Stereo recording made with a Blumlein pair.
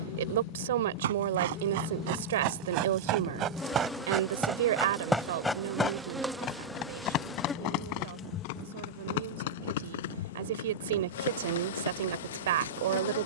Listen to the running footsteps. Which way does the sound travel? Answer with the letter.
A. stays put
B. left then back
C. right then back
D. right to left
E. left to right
D.